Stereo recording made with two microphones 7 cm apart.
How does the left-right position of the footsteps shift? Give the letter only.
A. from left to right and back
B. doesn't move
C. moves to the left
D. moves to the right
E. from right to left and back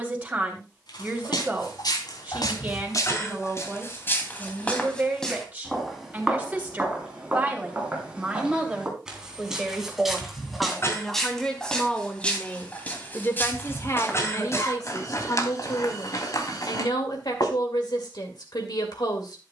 A.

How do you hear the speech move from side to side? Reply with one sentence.
You can hear the speech move from right to left.